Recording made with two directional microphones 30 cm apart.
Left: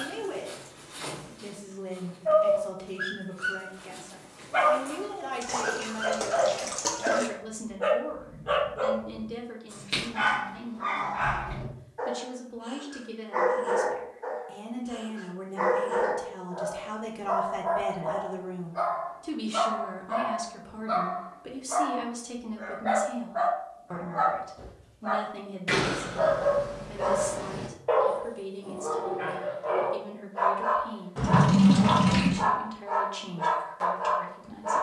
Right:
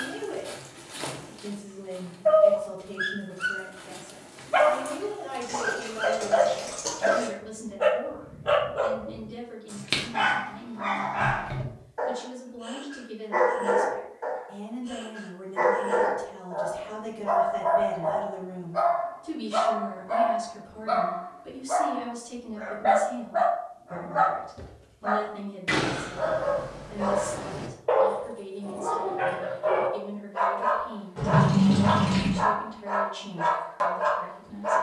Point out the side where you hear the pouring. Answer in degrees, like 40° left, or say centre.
30° left.